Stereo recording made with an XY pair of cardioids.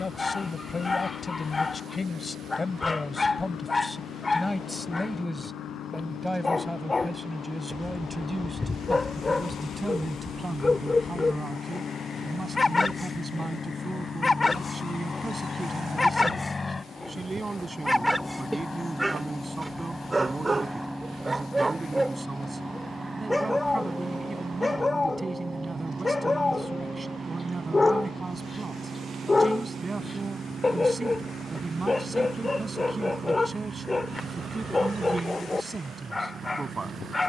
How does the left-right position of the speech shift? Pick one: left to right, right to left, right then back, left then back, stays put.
left to right.